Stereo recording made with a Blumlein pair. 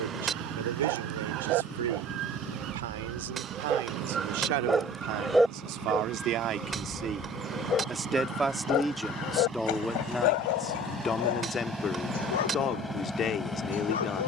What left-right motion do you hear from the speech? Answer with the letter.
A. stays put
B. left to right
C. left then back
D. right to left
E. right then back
D.